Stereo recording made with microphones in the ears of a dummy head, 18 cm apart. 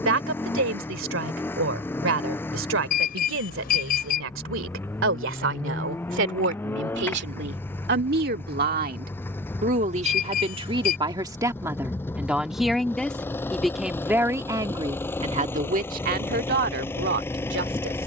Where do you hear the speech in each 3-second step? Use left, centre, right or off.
right, right, right, right, centre, right.